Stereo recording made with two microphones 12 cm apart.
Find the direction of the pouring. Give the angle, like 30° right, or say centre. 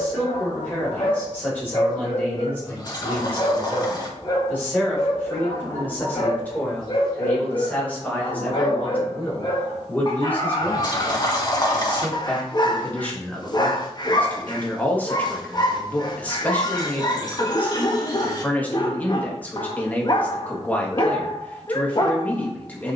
40° left.